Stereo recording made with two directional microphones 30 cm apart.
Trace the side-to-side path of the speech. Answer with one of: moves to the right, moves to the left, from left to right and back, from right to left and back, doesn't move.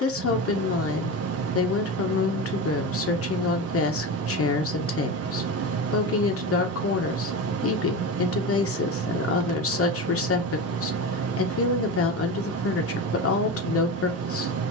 doesn't move.